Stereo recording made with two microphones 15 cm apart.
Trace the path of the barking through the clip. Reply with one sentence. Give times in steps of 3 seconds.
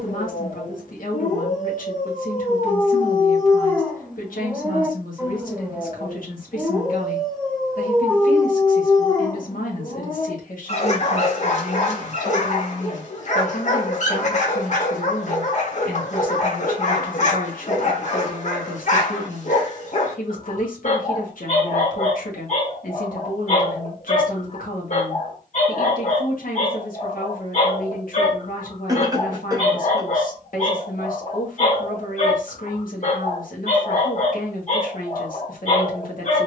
You can hear the barking on the left from 0 s, in the centre from 3 s and on the left from 9 s.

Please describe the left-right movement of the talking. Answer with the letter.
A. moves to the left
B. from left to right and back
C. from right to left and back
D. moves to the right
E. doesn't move
E.